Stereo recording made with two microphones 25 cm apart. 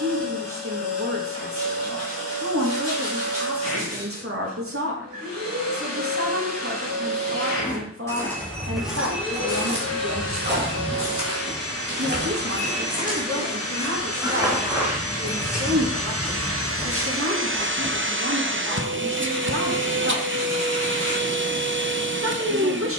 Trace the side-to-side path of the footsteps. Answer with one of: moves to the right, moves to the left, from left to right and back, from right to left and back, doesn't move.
from left to right and back.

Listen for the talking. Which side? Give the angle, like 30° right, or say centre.
50° right.